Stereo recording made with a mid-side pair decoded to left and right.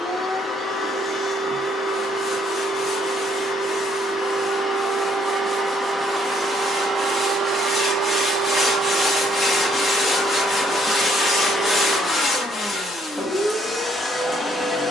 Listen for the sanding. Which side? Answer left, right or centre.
left.